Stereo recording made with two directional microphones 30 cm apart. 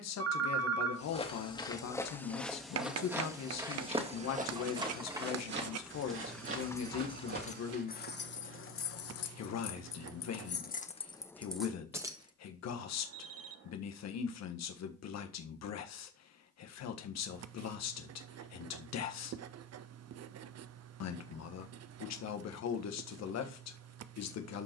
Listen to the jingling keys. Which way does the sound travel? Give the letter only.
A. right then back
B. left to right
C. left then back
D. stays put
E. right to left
C.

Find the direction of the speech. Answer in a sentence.
In this clip you hear the speech on the left.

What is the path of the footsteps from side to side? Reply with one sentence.
You can hear the footsteps move to the right.